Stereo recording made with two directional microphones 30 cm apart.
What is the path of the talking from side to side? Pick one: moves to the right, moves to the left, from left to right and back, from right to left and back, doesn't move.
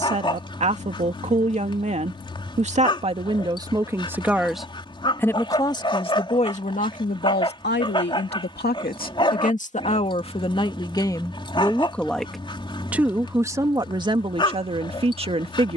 from right to left and back.